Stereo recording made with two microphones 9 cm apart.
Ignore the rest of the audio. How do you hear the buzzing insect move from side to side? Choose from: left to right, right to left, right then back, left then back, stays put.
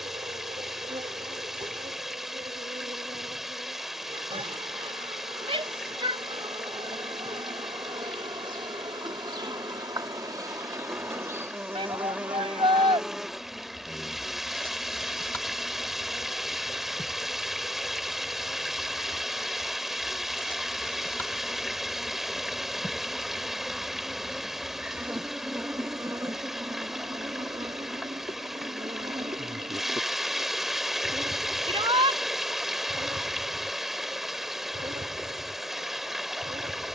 left then back.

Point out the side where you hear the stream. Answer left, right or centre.
centre.